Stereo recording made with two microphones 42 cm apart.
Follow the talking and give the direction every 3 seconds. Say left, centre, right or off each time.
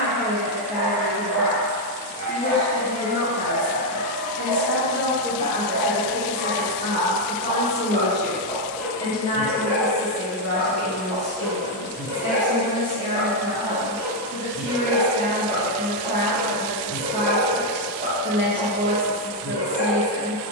left, left, centre, left, left, left, left.